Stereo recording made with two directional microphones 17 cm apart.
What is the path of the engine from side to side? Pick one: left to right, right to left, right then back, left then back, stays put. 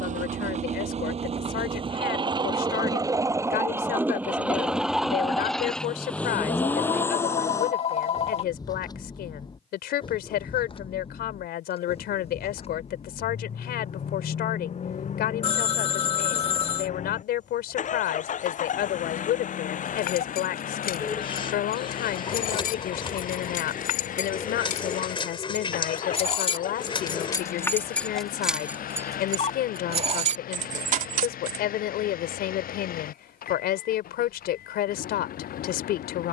right to left.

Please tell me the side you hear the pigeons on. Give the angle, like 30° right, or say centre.
30° left.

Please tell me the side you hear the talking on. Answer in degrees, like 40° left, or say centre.
70° left.